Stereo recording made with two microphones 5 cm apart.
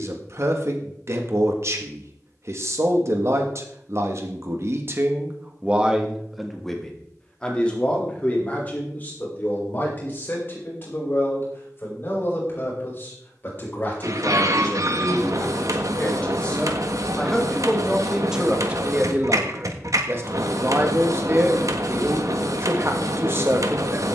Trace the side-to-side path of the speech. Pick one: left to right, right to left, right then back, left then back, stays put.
left then back.